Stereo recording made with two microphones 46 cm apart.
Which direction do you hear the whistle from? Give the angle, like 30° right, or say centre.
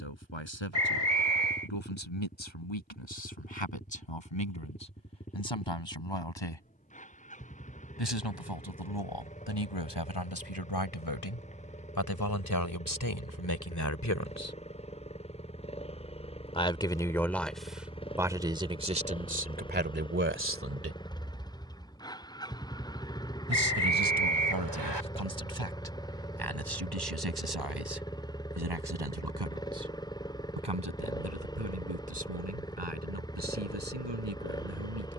70° right.